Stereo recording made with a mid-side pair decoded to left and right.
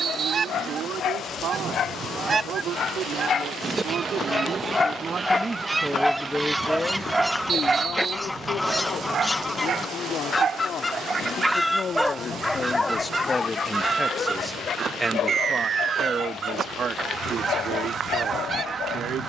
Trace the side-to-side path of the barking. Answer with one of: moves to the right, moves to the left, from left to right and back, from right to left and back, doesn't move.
from left to right and back.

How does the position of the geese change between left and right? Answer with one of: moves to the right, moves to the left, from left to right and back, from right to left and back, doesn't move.
from right to left and back.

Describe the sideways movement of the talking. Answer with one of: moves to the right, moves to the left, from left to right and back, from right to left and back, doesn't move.
from right to left and back.